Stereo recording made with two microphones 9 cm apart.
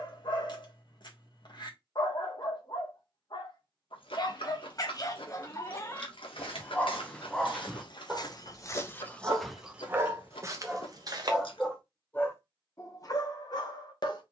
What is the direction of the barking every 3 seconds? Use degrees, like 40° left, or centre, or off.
50° left, 40° left, centre, 20° right, 40° left.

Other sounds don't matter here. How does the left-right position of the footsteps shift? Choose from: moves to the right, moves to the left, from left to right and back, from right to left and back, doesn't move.
moves to the right.